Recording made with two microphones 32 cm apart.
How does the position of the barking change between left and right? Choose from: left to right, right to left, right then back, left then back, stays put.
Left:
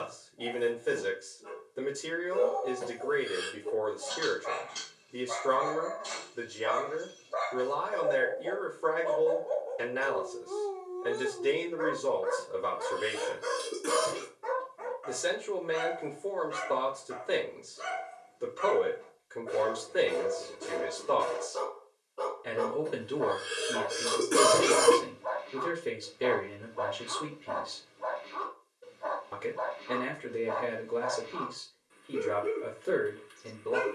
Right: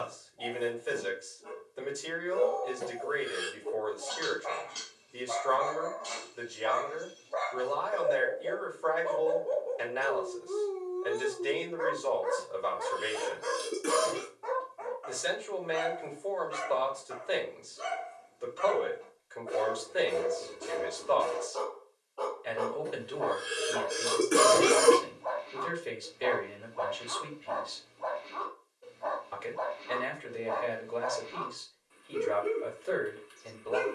right then back.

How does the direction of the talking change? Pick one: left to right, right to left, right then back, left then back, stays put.
stays put.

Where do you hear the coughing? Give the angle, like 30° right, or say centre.
centre.